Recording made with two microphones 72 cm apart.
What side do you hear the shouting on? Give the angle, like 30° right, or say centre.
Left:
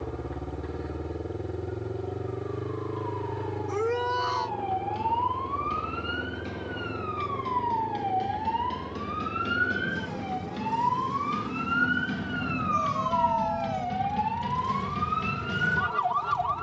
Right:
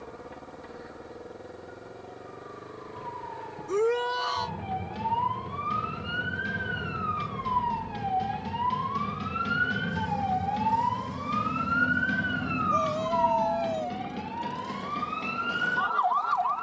60° right.